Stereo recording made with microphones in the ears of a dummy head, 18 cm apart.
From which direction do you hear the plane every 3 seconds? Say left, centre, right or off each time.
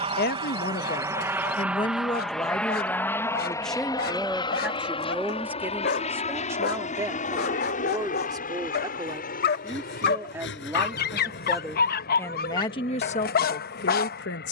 centre, left, left, left, left.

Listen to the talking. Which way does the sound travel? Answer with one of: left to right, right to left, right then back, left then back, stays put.
right then back.